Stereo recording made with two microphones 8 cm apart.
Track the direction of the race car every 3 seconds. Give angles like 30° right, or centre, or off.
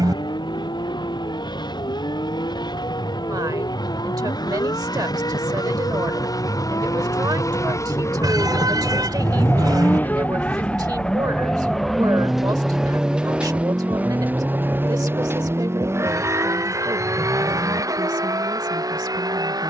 70° left, 60° left, 40° left, 20° left, 10° right, 30° right, 50° right.